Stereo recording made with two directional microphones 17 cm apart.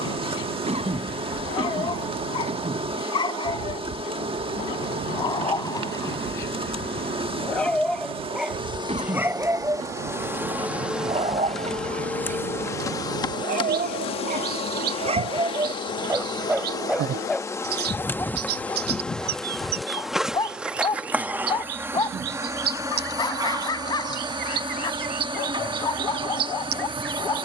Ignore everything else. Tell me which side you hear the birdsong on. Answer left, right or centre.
right.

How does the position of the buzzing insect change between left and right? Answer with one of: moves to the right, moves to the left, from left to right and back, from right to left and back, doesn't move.
from right to left and back.